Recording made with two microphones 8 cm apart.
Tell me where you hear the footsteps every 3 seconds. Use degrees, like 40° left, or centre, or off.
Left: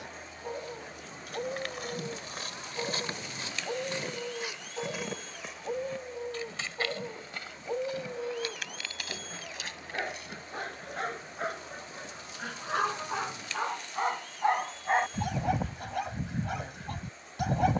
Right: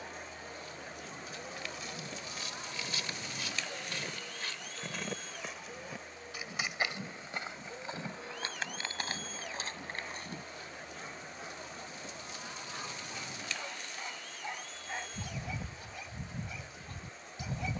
50° left, 20° left, 20° right, 30° right, off, off.